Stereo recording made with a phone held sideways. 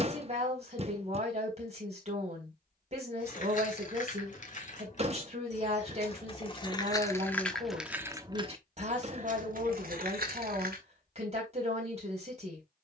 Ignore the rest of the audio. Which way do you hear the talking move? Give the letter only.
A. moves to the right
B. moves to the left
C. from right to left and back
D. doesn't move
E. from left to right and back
D.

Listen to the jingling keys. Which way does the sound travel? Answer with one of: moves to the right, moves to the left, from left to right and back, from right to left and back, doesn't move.
moves to the right.